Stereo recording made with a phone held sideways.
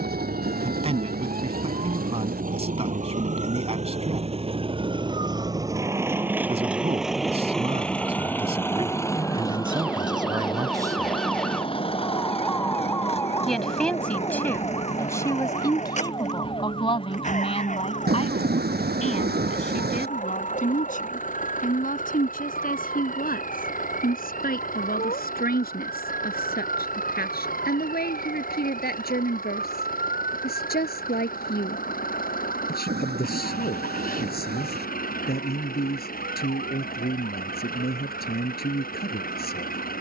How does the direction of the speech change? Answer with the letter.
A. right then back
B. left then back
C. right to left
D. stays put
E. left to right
C.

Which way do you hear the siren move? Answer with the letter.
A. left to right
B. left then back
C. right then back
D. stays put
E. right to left
E.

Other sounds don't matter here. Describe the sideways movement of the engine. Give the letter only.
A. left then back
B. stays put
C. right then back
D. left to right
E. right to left
E.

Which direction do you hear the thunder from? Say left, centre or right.
right.